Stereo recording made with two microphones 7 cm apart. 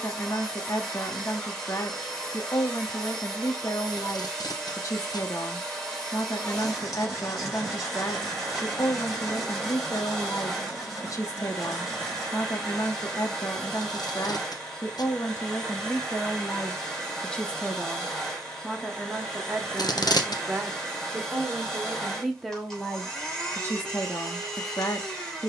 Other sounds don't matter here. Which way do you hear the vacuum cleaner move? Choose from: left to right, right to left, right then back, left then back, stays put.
stays put.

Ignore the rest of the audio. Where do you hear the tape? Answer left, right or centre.
left.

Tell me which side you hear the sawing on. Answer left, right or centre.
centre.